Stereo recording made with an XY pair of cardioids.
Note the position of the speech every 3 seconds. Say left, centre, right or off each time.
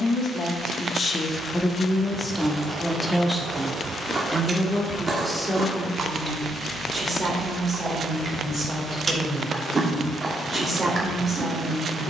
left, centre, right, right.